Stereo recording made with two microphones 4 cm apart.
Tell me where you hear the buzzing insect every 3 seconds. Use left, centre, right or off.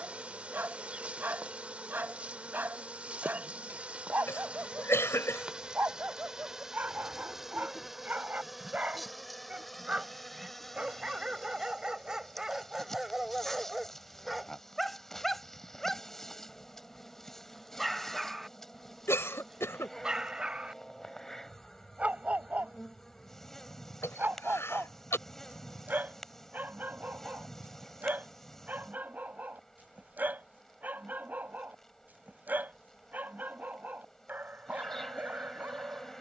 right, right, centre, centre, centre, centre, centre, centre, centre, centre, centre, centre.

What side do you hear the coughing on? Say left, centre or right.
left.